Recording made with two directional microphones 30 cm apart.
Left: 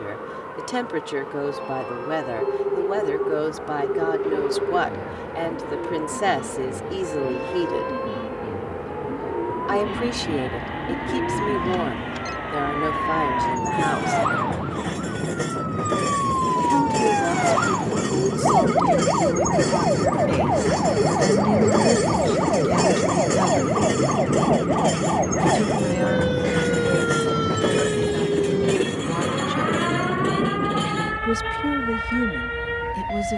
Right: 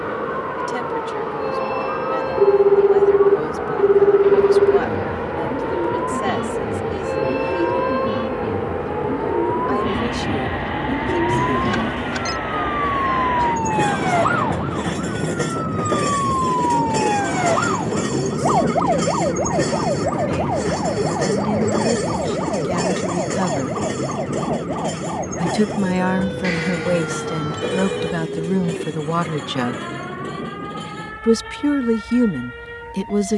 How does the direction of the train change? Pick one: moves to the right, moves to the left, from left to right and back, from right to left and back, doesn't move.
moves to the left.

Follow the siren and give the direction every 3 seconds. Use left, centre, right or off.
right, right, right, right, right, centre, centre, left, left, left, left.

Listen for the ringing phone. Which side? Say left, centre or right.
right.